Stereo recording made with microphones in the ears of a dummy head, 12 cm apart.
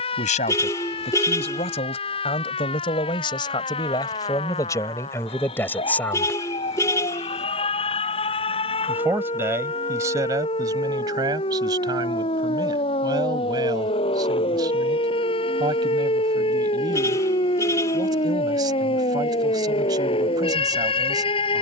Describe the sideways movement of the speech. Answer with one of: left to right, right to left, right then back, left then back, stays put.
left to right.